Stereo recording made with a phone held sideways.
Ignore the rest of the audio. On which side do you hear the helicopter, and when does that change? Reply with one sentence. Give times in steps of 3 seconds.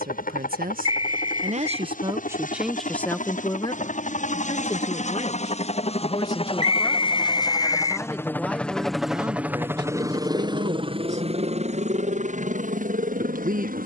You can hear the helicopter on the left from 0 s and on the right from 9 s.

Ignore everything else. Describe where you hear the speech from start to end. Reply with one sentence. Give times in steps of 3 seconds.
You can hear the speech on the right from 0 s, on the left from 3 s, in the centre from 6 s and on the right from 9 s.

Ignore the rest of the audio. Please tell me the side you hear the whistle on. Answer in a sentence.
In this clip you hear the whistle on the left.